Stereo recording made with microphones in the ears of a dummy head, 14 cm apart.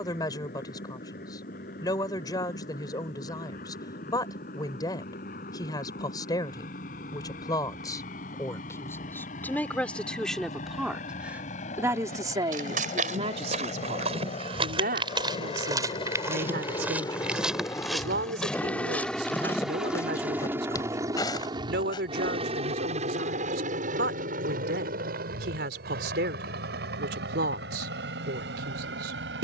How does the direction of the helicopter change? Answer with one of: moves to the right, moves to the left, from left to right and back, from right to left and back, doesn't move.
moves to the right.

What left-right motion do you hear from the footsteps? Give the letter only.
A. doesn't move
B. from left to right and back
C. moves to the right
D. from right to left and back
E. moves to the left
E.